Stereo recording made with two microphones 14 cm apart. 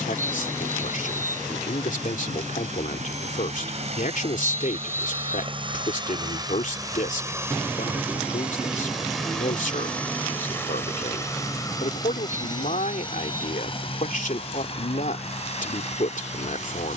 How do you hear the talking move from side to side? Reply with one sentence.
You can hear the talking stay put.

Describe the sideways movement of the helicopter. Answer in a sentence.
You can hear the helicopter move from right to left.